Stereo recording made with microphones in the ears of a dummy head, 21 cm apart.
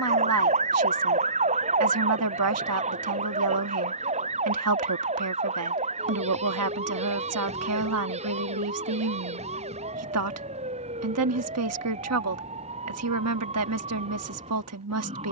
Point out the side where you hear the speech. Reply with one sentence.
You can hear the speech on the right.